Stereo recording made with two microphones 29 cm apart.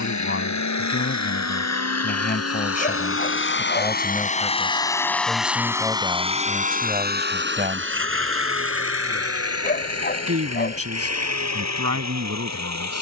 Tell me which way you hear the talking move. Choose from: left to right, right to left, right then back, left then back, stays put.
left to right.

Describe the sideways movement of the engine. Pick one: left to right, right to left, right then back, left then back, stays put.
left to right.